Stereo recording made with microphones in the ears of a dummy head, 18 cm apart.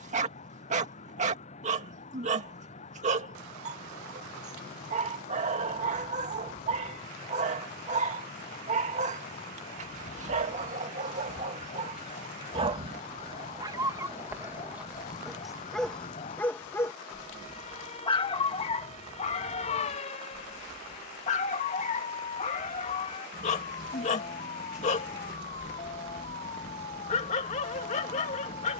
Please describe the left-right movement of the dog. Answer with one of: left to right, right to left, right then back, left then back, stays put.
right to left.